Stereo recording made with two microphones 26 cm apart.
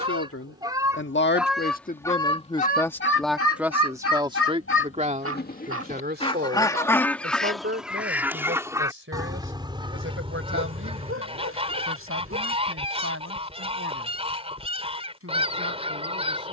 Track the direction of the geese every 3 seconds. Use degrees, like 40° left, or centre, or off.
centre, 50° left, centre, 20° right, 20° right, 20° right.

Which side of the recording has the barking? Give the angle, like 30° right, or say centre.
60° right.